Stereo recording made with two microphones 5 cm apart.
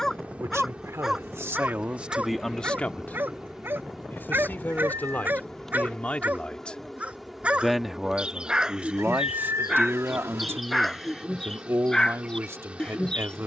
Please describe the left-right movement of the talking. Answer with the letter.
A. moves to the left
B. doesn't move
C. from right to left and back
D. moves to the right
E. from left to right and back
C.